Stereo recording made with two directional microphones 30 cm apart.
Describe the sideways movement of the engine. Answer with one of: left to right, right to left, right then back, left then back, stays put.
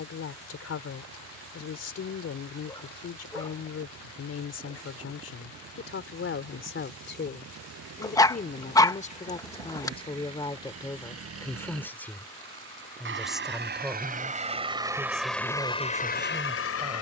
right to left.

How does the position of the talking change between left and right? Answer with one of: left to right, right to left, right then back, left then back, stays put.
left to right.